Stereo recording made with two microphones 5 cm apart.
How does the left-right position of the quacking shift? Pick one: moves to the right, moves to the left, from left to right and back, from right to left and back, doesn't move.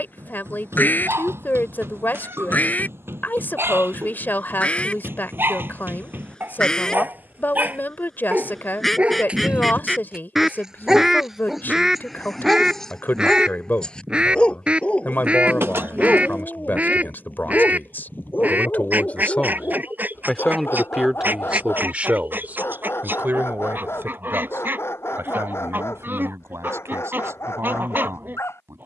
moves to the right.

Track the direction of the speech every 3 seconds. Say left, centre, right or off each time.
left, left, left, left, left, left, left, right, right, right.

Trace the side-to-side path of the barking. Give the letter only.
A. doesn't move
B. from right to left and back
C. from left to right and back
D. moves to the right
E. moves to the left
E.